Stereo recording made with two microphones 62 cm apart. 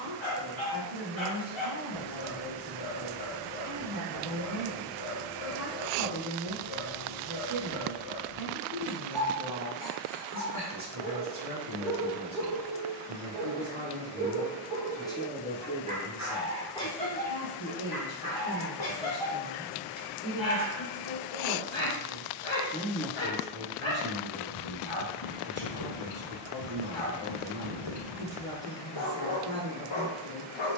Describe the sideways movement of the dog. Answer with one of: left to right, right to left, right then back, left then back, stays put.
right then back.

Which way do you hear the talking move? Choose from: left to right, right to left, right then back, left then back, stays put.
left then back.